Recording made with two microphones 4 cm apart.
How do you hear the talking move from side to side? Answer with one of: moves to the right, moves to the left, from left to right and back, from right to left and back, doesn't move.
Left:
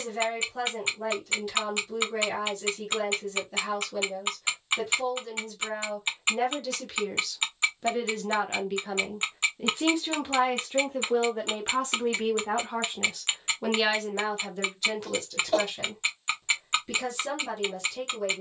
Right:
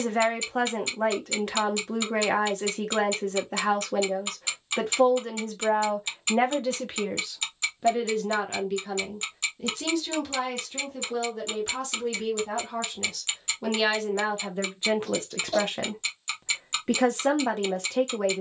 from right to left and back.